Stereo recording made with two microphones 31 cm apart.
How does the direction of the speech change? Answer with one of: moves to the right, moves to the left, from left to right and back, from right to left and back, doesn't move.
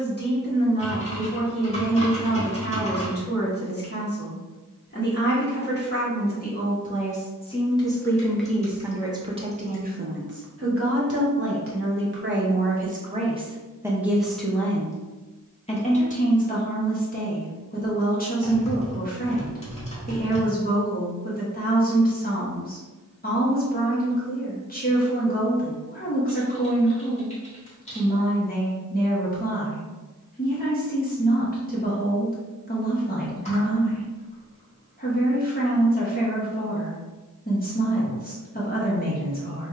from left to right and back.